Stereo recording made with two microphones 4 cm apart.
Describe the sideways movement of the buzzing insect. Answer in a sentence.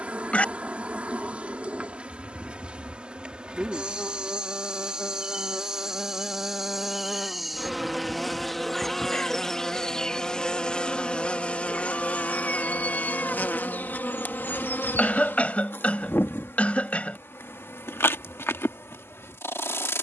You can hear the buzzing insect travel towards the left.